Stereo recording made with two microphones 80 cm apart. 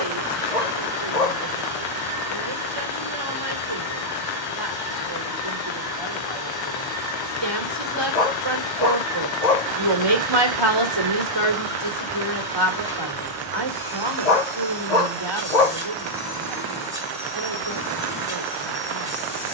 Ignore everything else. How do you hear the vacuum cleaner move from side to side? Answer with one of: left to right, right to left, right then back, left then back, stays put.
stays put.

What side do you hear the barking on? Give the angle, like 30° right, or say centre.
60° left.